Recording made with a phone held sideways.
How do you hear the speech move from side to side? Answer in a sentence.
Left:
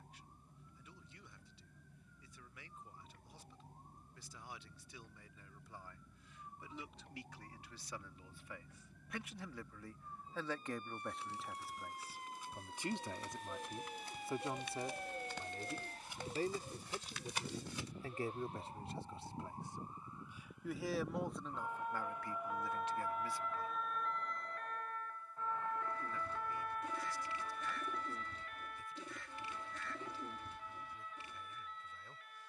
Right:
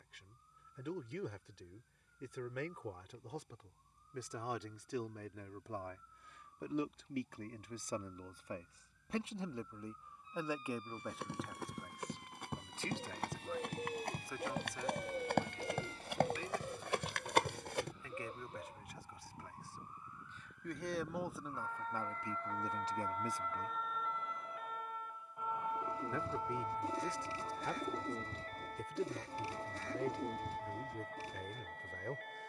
In this clip you hear the speech go left and come back.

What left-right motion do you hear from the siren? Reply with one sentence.
In this clip you hear the siren travel towards the right.